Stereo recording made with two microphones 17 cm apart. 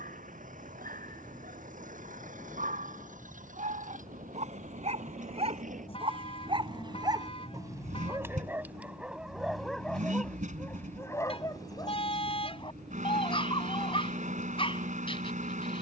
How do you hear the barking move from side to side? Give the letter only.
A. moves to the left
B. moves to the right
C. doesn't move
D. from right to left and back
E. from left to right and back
A.